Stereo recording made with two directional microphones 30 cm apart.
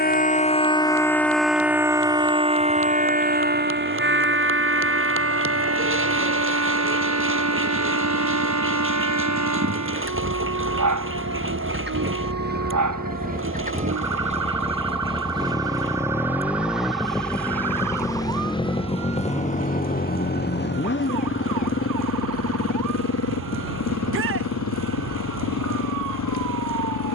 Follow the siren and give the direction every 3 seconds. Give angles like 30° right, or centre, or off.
centre, 40° right, 50° right, 60° right, 60° right, 60° right, 60° right, 70° right, 70° right.